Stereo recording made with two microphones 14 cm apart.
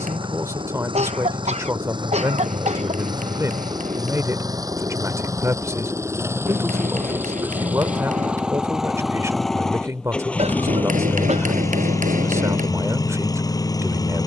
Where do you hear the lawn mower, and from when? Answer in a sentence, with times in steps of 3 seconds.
In this clip you hear the lawn mower on the right from 0 s, in the centre from 6 s and on the left from 12 s.